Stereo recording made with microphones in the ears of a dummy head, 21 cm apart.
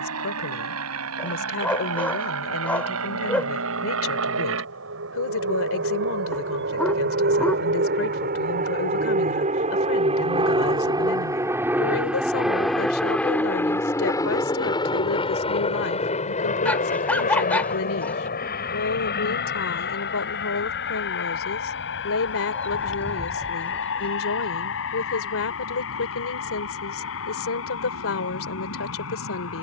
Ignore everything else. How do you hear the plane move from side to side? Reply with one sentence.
You can hear the plane move to the left.